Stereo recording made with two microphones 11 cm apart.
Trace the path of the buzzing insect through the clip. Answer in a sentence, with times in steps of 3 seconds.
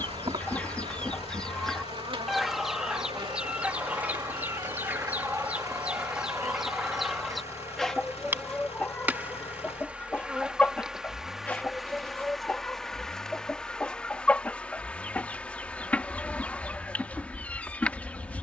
In this clip you hear the buzzing insect on the right from 0 s and in the centre from 9 s.